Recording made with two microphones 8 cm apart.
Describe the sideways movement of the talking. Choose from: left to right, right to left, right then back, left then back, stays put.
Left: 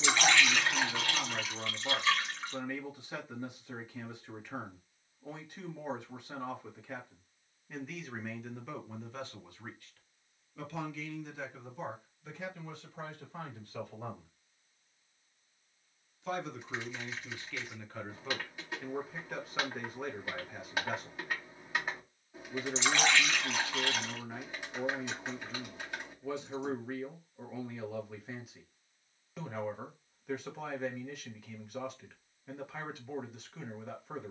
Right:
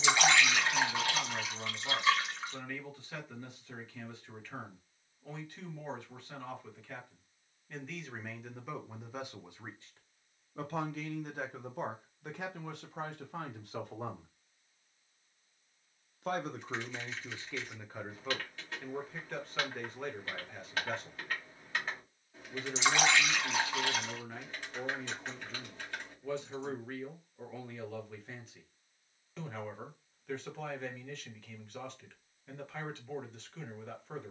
right then back.